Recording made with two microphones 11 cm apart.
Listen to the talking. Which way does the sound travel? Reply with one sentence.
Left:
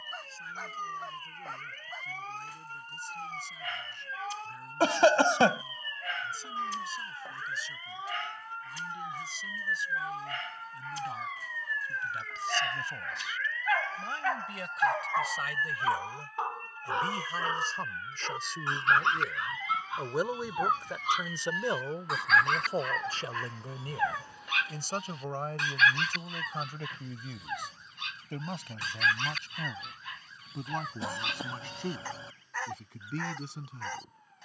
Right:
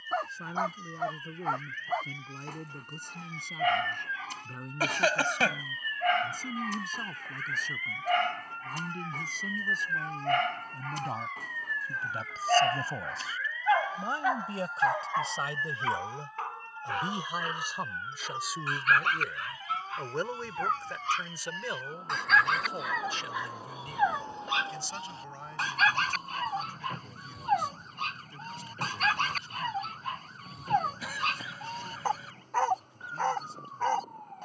In this clip you hear the talking move to the left.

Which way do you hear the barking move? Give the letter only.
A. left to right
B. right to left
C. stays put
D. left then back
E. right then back
D.